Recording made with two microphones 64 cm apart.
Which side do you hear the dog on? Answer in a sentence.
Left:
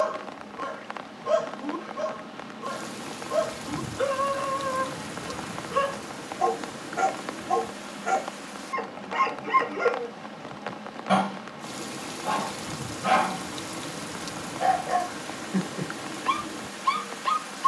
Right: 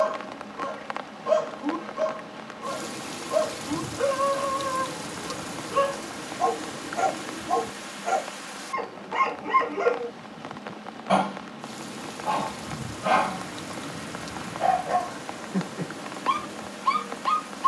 In this clip you hear the dog on the left.